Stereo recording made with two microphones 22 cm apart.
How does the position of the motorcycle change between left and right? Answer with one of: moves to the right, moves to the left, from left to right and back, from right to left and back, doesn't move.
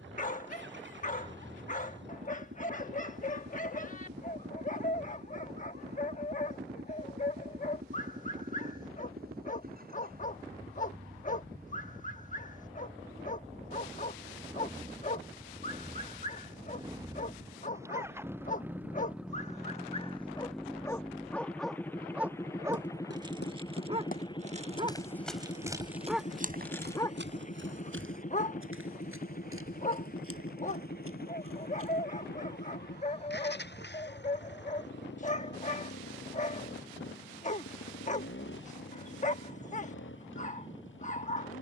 moves to the left.